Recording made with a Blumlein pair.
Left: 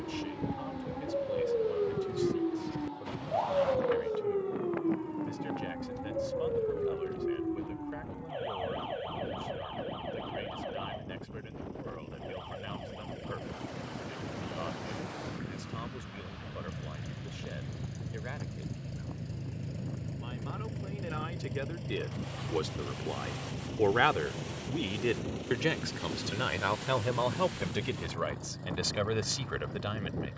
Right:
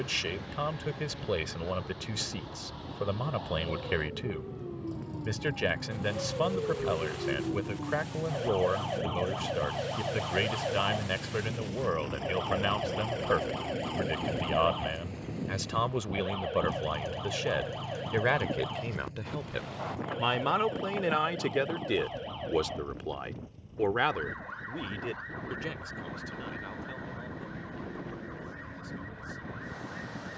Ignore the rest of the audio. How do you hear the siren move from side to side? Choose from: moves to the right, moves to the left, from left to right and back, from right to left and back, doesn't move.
moves to the right.